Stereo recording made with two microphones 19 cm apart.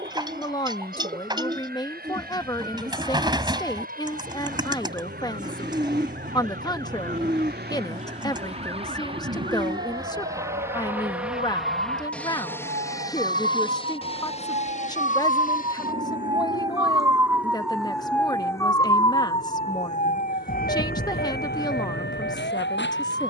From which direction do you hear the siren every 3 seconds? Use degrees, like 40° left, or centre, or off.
70° right, 70° right, 60° right, 60° right, 50° right, 20° right, 30° left, 60° left.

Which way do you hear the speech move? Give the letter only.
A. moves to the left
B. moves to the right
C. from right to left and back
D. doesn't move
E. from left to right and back
D.